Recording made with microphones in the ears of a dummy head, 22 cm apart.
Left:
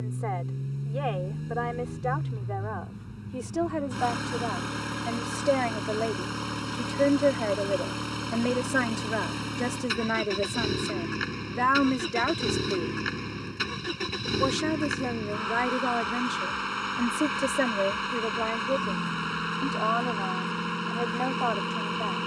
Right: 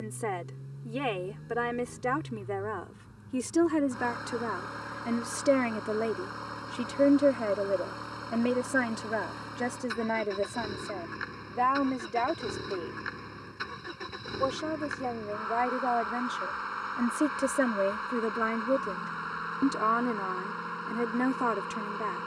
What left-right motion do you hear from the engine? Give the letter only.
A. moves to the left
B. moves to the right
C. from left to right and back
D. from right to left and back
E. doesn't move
E.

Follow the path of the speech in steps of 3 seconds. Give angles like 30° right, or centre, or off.
40° right, 30° right, 10° right, 20° left, 30° left, 10° left, 30° right, 30° right.